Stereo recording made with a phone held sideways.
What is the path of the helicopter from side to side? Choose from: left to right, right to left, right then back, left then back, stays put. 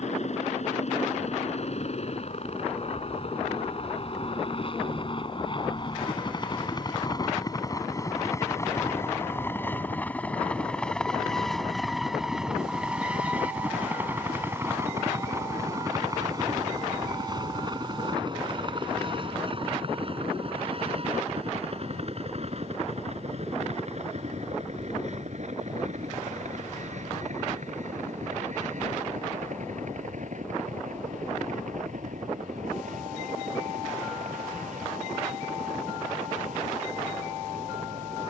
left to right.